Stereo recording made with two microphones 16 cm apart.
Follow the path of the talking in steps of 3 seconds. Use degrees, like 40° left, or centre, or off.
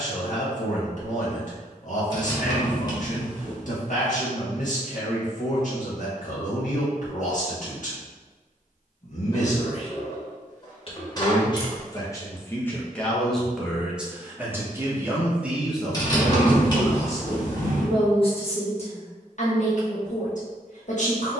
60° left, 60° left, 60° left, 40° left, centre, 10° left, 50° left.